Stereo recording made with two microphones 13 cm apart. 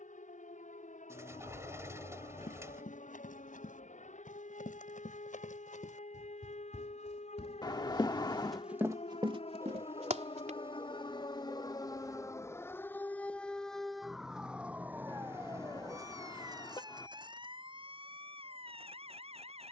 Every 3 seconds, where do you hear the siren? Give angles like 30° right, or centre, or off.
80° left, 70° left, 60° left, 40° left, 10° left, 30° right, 40° right.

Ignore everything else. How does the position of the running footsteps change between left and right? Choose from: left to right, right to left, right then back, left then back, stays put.
left to right.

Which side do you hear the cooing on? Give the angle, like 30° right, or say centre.
20° right.